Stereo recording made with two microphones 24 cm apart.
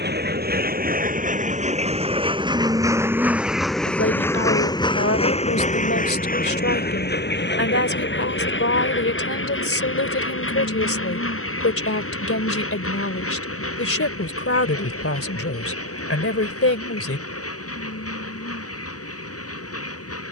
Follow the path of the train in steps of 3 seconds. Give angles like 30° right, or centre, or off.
30° right, 10° left, 50° left, 60° left, 70° left, 70° left, 80° left.